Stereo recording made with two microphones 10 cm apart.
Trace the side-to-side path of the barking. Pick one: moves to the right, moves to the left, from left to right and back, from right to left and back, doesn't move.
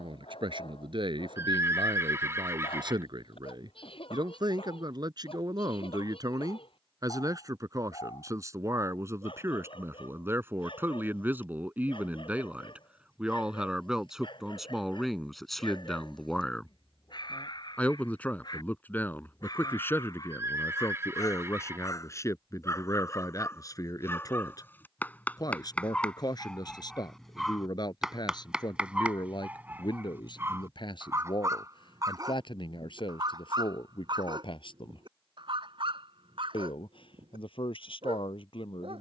moves to the right.